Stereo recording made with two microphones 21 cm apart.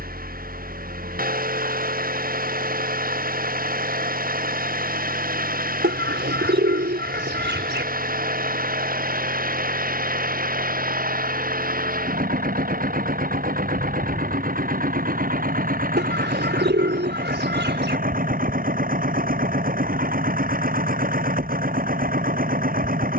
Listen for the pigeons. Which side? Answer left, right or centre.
right.